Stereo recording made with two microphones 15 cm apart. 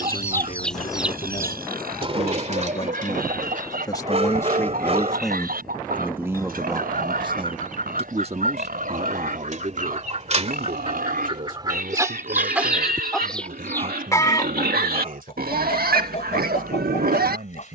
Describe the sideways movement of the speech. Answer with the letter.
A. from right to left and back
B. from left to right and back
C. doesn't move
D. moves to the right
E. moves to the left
D.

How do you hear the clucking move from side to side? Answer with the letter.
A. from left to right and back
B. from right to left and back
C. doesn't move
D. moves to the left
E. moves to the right
A.